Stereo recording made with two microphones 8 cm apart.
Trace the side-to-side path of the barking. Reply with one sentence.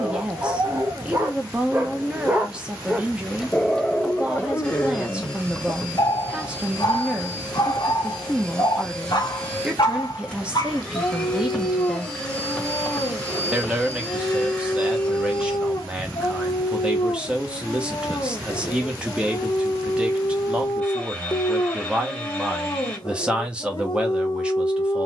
You can hear the barking go from the right side to the left.